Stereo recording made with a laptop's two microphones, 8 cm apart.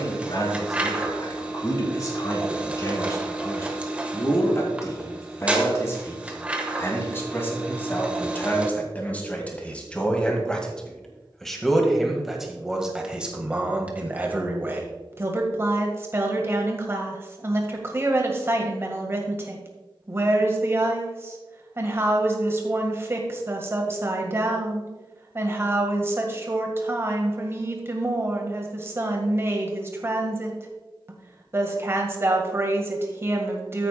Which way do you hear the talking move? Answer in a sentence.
In this clip you hear the talking move to the right.